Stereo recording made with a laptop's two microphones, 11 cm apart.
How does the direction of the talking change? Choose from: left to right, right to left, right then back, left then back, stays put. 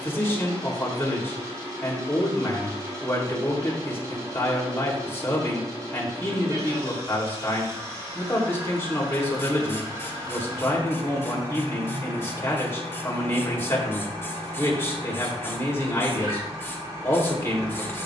stays put.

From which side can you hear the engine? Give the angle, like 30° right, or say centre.
30° right.